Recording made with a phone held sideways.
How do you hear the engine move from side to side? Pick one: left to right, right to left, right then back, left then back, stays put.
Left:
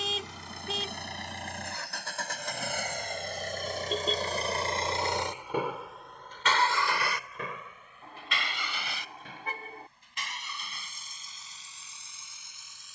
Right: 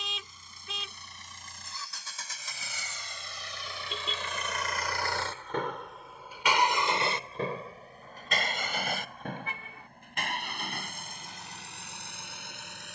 left to right.